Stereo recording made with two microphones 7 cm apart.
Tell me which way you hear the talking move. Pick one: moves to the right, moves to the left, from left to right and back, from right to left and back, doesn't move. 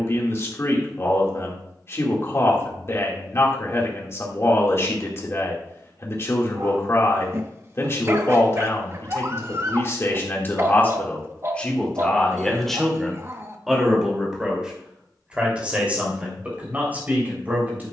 moves to the right.